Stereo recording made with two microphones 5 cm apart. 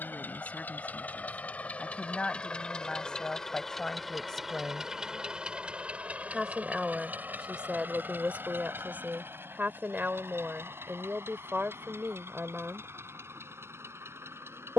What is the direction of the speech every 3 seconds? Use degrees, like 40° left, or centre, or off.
30° left, 20° left, 20° right, 40° right, 40° right.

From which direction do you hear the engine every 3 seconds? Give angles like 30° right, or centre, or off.
40° left, 10° right, 40° right, 60° right, 70° right.